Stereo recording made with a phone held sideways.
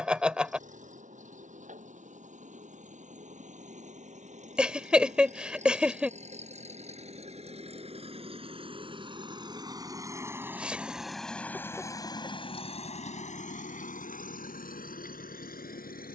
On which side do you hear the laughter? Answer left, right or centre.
centre.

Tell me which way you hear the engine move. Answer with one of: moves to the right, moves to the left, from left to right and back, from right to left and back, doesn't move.
moves to the left.